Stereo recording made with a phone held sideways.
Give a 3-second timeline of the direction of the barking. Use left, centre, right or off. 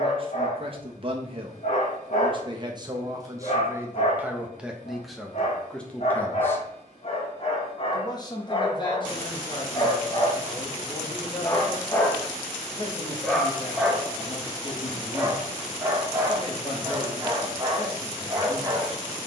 left, left, left, left, centre, right, right.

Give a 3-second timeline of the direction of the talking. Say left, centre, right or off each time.
right, centre, left, left, left, left, left.